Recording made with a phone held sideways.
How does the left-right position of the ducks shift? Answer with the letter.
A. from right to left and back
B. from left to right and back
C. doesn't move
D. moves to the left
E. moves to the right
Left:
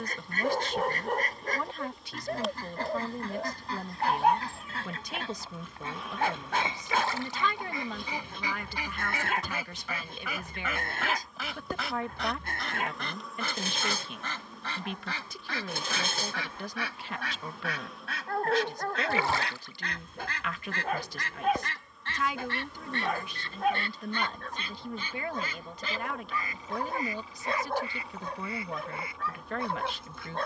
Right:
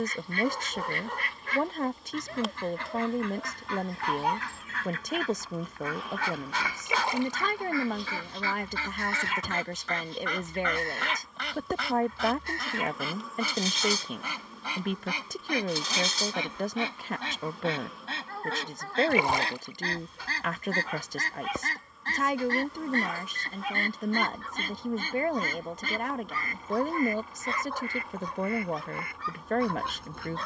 E.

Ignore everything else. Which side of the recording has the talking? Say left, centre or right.
right.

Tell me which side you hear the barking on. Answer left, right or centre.
left.